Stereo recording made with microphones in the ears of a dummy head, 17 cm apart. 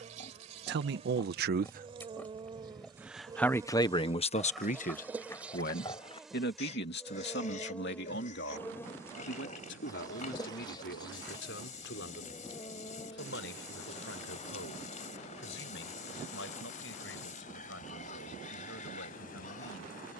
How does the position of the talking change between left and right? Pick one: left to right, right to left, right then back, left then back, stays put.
right to left.